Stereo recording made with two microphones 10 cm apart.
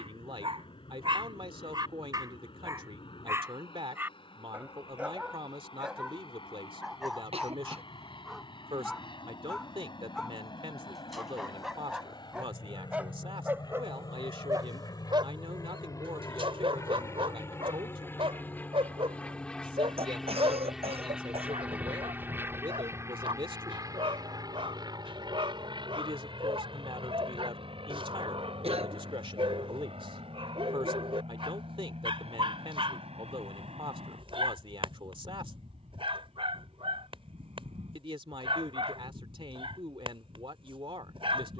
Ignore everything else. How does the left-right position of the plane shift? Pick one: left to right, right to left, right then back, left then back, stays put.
left to right.